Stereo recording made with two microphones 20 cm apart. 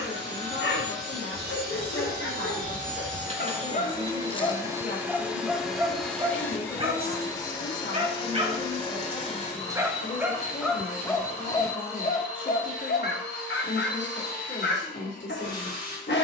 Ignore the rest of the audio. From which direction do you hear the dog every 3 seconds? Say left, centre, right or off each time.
left, left, right, centre, left, left.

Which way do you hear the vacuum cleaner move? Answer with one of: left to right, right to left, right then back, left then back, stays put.
right to left.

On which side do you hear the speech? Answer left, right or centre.
left.